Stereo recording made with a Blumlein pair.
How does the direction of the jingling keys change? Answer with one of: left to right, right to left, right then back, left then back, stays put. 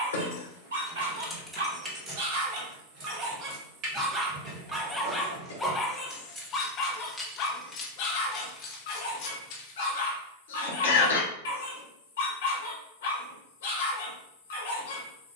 right then back.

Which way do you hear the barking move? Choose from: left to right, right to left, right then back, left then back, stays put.
right to left.